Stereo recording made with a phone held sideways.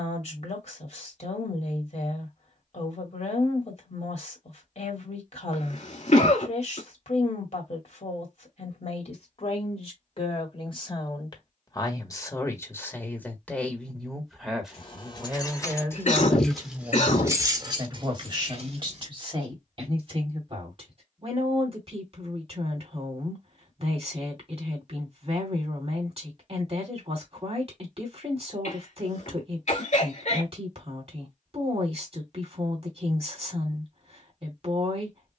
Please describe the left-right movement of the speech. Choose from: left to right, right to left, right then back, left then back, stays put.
left to right.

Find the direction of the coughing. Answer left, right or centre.
left.